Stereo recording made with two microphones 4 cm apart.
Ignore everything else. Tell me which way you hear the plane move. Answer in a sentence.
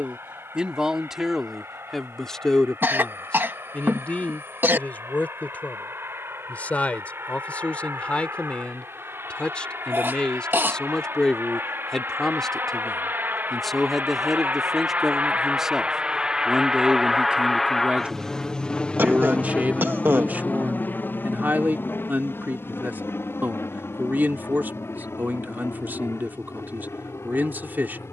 In this clip you hear the plane move to the left.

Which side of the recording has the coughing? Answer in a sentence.
You can hear the coughing on the right.